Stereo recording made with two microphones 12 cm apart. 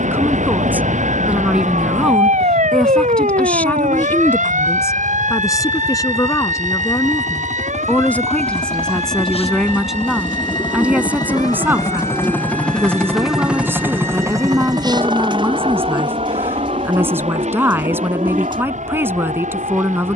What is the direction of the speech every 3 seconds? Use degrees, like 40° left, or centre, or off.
10° right, 20° left, 20° left, 10° right, 20° right, 20° right, 20° right.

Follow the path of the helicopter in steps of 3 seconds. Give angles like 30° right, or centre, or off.
70° left, 70° left, 60° left, 40° left, 10° right, 50° right, 60° right.